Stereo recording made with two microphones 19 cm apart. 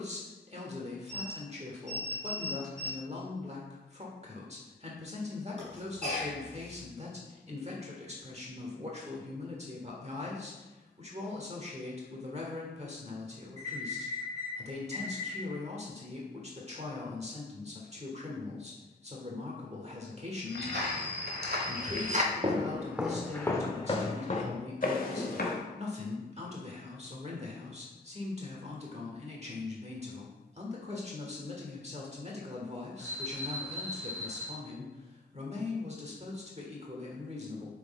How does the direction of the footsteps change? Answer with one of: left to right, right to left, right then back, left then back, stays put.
right to left.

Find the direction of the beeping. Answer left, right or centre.
right.